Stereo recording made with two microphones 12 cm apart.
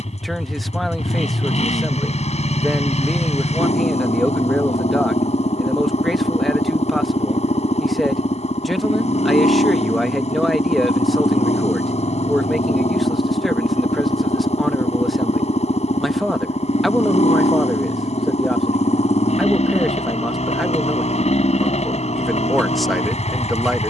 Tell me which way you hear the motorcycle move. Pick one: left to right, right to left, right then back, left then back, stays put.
stays put.